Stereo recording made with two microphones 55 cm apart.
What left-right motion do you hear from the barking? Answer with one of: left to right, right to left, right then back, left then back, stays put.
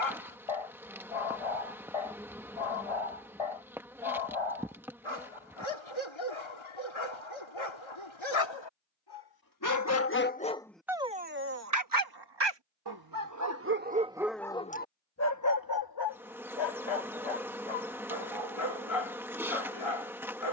right then back.